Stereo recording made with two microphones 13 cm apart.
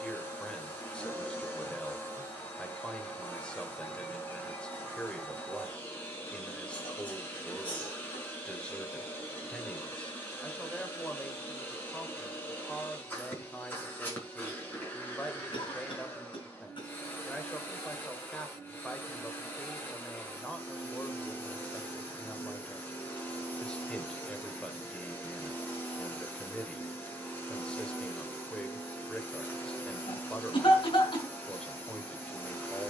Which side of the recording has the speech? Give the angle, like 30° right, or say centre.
10° left.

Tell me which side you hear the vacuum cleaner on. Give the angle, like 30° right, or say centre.
10° left.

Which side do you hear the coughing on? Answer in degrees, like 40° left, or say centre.
40° left.